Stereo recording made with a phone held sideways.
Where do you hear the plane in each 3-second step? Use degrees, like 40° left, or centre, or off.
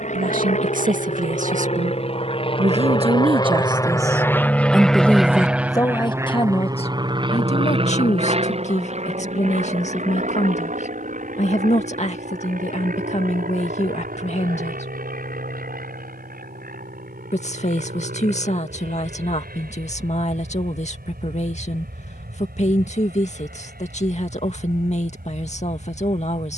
50° left, 10° left, 30° right, 60° right, 60° right, 70° right, 70° right, 70° right, 80° right.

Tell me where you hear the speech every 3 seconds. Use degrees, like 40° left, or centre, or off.
60° right, 10° right, 50° left, 50° left, 50° left, 50° left, 50° left, 50° left, 50° left.